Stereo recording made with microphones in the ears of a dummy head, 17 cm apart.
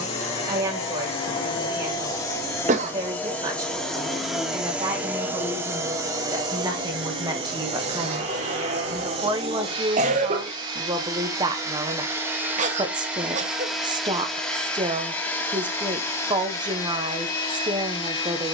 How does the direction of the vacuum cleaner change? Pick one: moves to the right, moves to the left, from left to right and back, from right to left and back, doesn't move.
from left to right and back.